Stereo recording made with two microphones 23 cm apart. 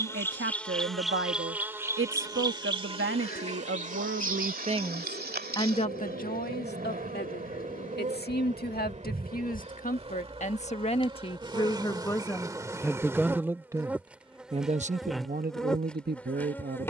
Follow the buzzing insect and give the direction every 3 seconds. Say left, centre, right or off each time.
centre, right, right, right, centre, centre.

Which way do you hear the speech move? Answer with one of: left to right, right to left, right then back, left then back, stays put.
left then back.